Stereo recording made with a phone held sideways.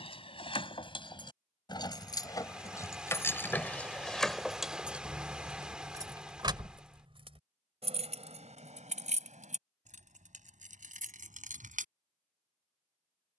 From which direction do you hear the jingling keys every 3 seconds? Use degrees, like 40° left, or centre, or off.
30° left, centre, 50° right, 70° right, off.